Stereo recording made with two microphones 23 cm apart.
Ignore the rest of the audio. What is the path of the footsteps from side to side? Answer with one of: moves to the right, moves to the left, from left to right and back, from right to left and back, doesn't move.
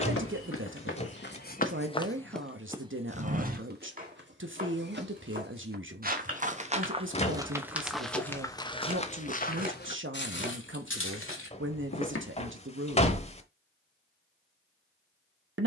from left to right and back.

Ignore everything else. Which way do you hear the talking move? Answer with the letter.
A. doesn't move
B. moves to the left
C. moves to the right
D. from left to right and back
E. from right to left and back
A.